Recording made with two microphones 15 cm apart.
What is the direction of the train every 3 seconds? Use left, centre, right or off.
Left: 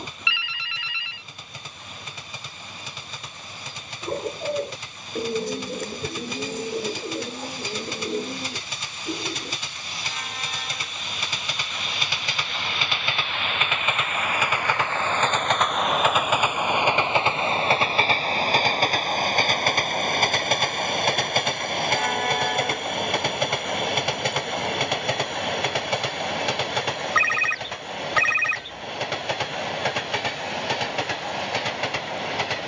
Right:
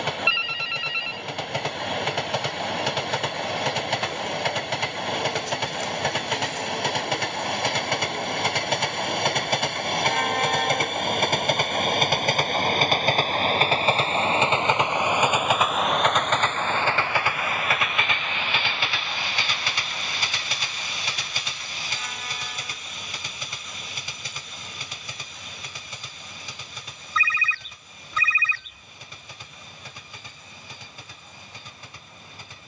right, right, right, right, right, centre, left, left, left, left, left.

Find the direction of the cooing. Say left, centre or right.
left.